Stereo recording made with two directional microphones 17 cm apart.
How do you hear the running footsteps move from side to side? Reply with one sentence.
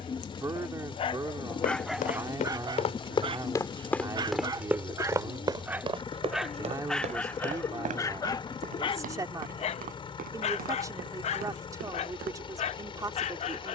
You can hear the running footsteps move to the right.